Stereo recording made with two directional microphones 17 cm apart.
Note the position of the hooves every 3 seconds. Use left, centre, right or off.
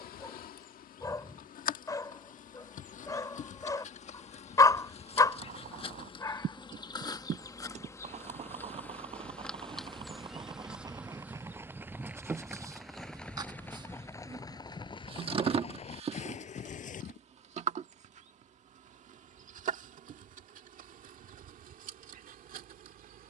off, right, right, right, centre, left, off, off.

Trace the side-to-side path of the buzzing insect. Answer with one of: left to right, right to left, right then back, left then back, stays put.
left to right.